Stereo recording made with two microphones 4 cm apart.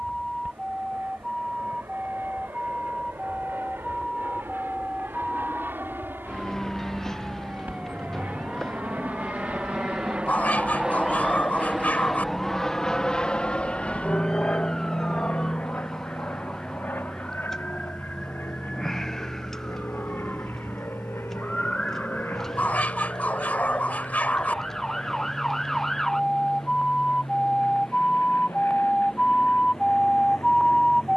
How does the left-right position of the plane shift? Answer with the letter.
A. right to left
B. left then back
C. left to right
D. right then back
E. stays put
A.